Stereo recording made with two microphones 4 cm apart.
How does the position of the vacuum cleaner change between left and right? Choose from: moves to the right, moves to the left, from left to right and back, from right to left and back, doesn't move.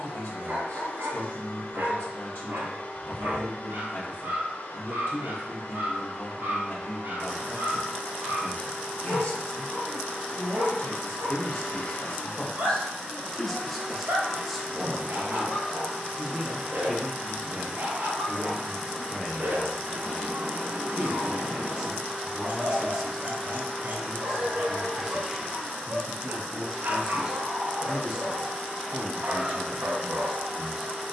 moves to the right.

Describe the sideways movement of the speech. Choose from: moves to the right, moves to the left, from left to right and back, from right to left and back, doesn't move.
moves to the right.